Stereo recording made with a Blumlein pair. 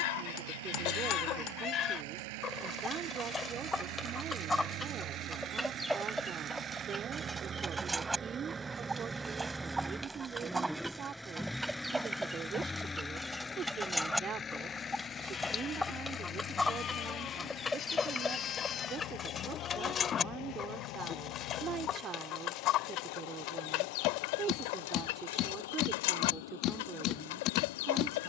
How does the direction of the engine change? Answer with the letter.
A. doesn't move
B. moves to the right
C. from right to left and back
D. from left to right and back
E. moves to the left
E.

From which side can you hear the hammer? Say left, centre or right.
left.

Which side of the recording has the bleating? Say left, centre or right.
left.